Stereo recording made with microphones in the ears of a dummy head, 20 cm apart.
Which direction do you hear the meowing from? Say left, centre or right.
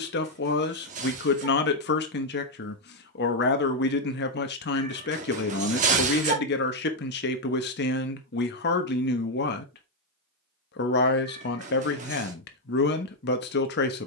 right.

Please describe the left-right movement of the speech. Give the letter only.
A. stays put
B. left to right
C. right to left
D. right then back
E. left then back
A.